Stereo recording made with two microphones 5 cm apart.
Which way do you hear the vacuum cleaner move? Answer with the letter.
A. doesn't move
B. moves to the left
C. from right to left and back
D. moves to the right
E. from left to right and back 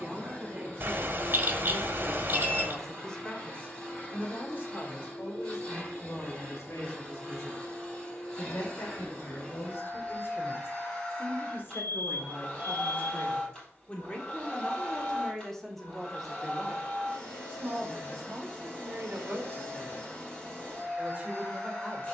A.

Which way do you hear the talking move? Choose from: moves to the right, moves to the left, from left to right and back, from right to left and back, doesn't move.
from right to left and back.